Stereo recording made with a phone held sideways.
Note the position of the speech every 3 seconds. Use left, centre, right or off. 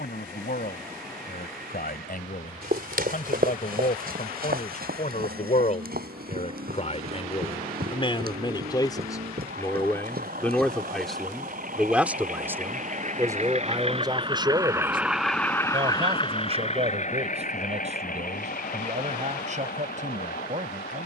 left, left, left, centre, right, right, right.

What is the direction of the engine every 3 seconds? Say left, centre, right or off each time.
right, right, right, right, right, left, left.